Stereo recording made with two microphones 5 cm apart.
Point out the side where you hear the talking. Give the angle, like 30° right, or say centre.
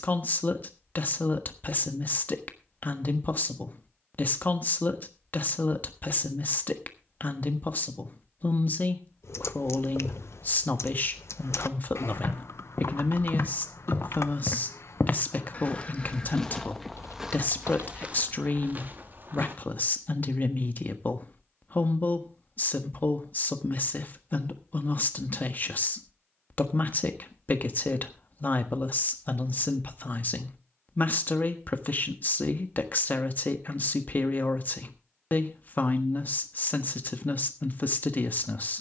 40° left.